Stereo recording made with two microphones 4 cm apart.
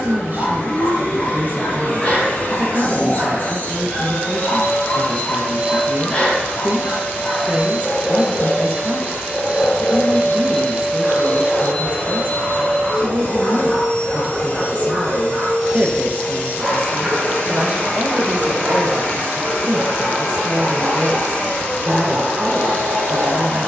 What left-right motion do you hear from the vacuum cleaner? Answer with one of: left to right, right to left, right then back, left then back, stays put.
stays put.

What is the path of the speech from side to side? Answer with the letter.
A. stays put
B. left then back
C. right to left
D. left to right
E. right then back
A.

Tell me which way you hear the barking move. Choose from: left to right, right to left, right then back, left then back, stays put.
left to right.